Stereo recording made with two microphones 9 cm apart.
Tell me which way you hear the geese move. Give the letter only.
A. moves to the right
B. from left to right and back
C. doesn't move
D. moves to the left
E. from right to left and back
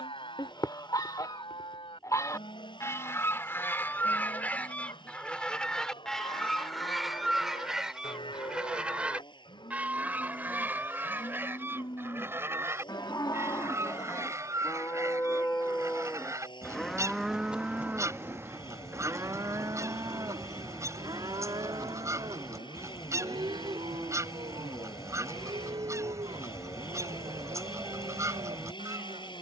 A.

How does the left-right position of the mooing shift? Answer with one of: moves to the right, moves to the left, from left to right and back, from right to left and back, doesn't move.
moves to the right.